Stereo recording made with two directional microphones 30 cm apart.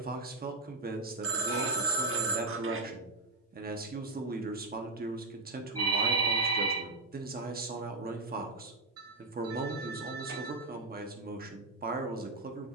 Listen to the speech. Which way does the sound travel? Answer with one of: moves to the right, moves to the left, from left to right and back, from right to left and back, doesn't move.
doesn't move.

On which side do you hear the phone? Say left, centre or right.
right.